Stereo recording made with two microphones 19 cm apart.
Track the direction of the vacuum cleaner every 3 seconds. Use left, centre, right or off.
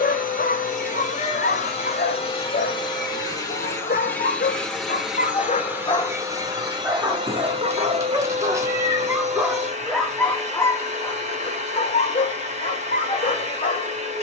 left, centre, right, right, right.